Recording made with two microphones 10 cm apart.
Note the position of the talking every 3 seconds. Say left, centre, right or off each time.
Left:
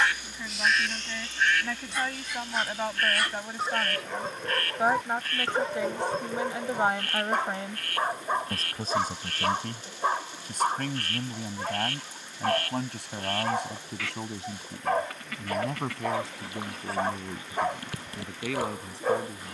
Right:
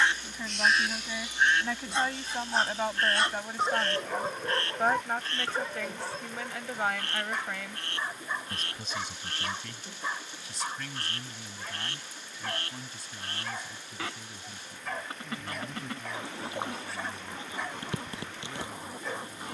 centre, centre, left, left, left, left, left.